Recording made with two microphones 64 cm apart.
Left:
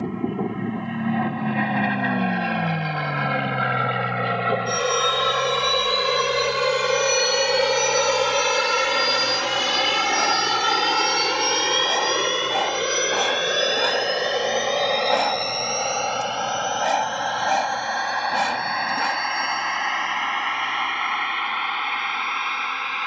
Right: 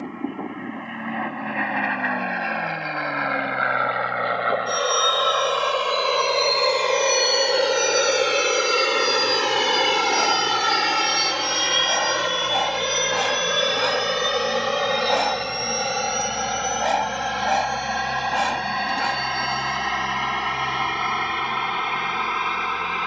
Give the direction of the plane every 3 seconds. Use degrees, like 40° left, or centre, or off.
70° left, 60° left, 40° left, centre, 30° right, 40° right, 50° right, 60° right.